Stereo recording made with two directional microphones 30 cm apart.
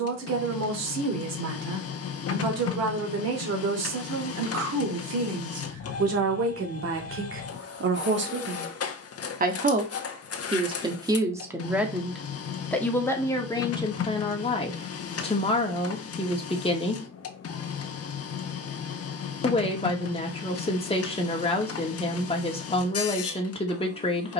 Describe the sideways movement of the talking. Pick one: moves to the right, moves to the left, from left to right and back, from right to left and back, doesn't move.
moves to the left.